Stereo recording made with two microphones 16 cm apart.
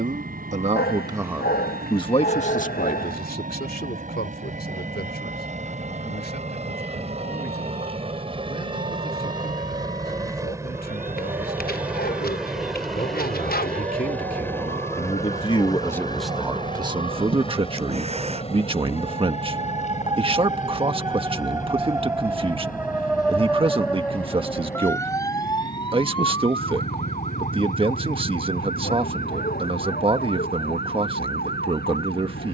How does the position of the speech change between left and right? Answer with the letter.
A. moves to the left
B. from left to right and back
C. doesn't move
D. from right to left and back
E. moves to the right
D.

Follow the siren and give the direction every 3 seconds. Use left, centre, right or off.
right, right, right, right, right, right, right, centre, left, left, left.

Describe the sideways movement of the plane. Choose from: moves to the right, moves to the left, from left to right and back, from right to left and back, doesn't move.
moves to the left.